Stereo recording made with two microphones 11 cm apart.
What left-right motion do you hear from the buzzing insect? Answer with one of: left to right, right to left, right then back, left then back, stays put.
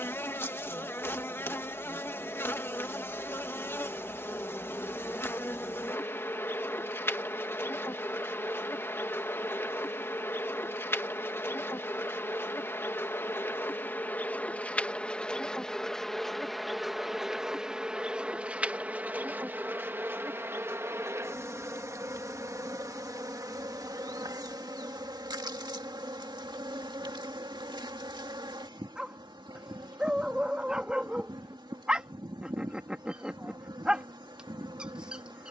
left to right.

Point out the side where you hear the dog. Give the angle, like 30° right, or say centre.
10° right.